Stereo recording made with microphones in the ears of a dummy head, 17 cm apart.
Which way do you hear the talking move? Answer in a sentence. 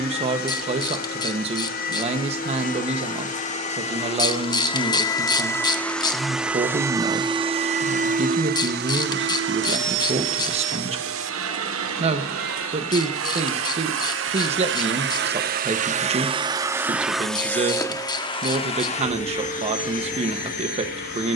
In this clip you hear the talking stay put.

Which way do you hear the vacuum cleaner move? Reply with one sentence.
You can hear the vacuum cleaner move from left to right and back again.